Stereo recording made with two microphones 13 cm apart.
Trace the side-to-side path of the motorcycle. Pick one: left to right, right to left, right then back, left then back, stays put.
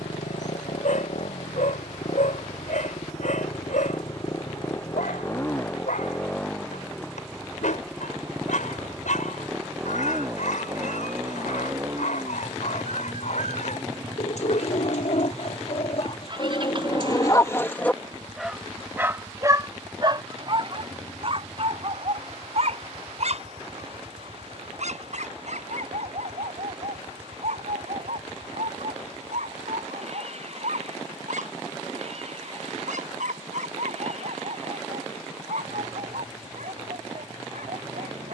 left to right.